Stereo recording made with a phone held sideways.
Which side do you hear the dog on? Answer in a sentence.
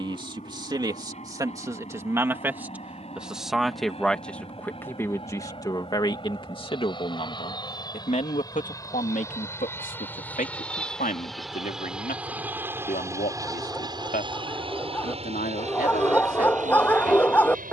You can hear the dog in the centre.